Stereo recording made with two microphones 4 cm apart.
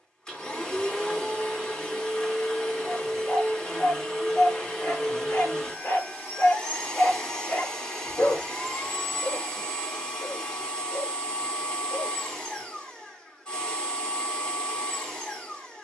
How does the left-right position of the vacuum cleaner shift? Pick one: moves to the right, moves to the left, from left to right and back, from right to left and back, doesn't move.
doesn't move.